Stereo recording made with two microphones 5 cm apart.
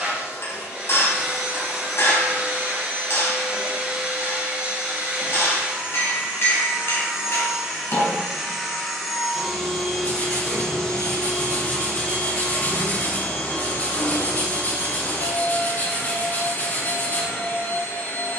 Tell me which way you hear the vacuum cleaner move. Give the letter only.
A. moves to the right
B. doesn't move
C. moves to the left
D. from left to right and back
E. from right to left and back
C.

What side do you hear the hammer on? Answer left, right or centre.
left.